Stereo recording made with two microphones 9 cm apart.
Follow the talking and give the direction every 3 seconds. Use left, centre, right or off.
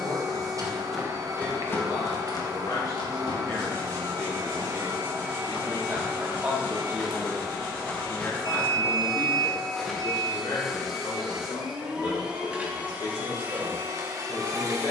left, centre, centre, left, left.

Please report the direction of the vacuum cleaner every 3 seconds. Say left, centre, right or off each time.
right, right, centre, centre, right.